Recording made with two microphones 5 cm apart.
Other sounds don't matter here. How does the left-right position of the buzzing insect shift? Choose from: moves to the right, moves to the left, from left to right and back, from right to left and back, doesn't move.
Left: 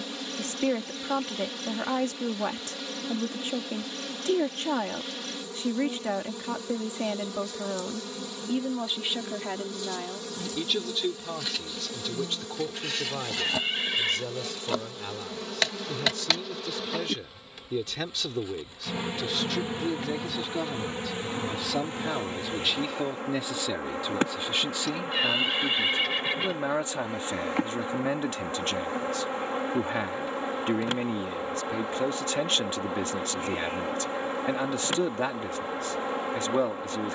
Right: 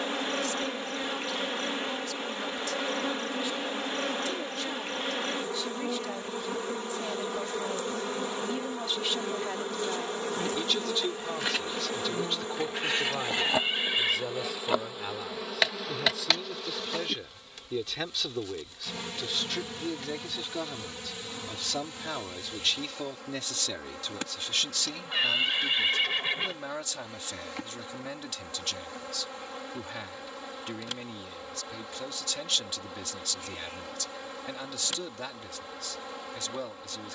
moves to the left.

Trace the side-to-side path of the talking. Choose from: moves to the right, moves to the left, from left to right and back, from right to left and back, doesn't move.
from left to right and back.